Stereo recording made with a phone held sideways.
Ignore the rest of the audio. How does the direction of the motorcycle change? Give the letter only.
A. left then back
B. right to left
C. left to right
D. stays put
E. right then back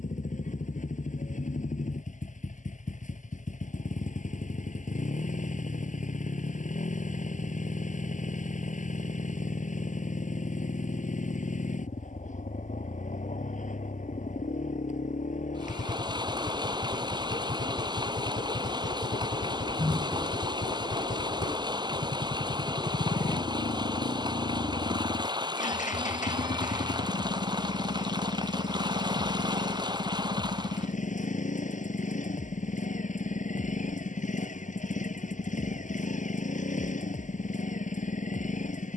D.